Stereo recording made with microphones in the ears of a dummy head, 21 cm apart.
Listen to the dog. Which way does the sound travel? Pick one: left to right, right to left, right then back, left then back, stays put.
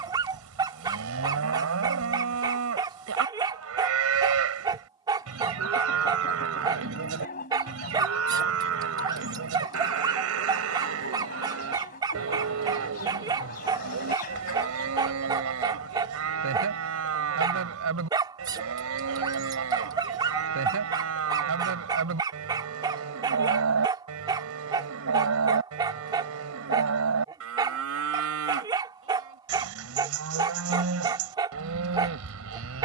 stays put.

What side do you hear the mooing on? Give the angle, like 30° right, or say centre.
70° right.